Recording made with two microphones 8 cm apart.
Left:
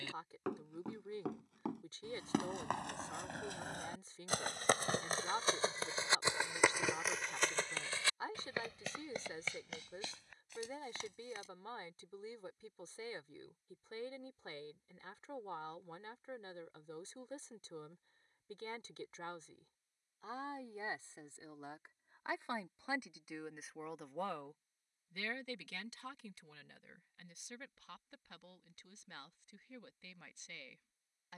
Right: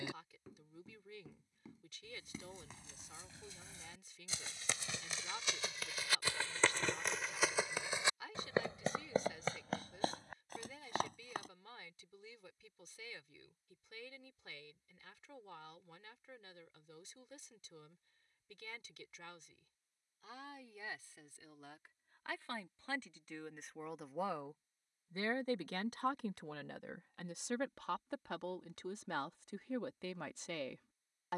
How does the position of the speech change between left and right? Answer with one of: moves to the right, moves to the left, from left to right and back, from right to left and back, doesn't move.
moves to the right.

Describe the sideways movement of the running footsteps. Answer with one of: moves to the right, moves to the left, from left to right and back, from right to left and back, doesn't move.
moves to the right.